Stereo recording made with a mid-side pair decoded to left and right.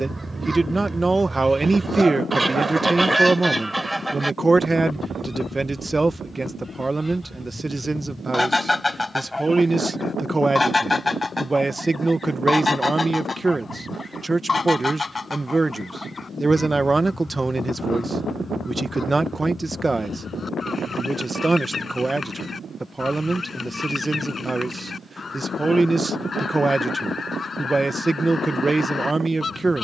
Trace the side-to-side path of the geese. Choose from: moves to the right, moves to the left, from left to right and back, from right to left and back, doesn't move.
moves to the left.